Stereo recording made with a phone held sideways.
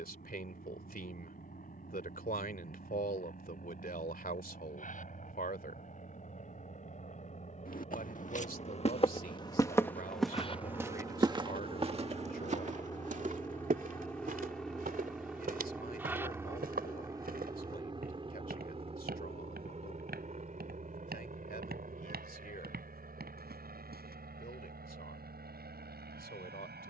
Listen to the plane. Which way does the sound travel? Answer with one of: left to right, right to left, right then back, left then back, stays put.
left to right.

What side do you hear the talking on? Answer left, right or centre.
left.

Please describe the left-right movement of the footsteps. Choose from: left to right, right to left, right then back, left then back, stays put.
left to right.